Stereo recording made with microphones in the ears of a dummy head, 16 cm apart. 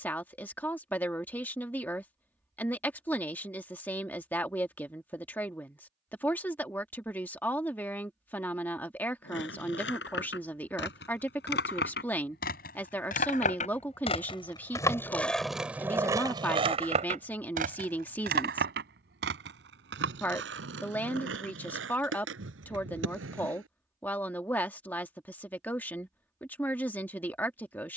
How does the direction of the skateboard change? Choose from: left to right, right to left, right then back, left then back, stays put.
left to right.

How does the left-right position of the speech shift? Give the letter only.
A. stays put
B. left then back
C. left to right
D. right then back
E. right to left
A.